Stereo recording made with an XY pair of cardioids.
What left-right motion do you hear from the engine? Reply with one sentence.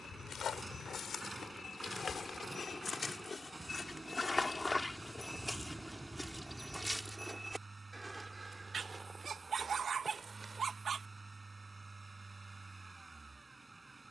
You can hear the engine stay put.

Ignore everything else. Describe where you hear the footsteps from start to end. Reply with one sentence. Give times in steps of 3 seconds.
You can hear the footsteps on the left from 0 s, in the centre from 6 s, on the right from 9 s and not at all from 12 s.